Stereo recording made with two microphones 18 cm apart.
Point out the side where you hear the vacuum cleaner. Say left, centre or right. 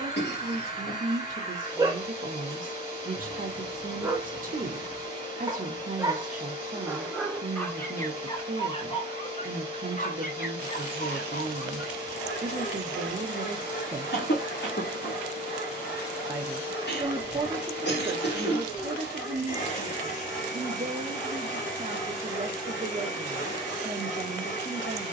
left.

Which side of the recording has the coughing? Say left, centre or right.
left.